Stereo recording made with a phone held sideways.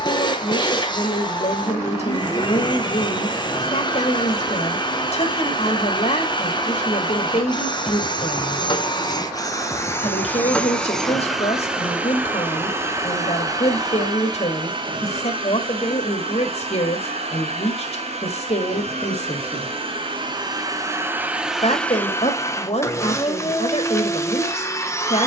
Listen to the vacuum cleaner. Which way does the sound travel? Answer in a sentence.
In this clip you hear the vacuum cleaner move from left to right and back again.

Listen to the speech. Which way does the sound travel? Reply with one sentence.
In this clip you hear the speech stay put.